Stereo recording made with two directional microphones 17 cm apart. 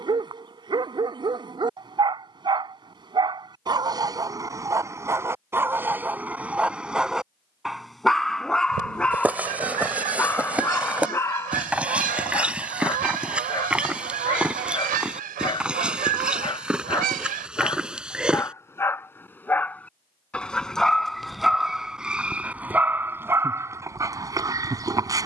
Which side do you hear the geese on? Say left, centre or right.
right.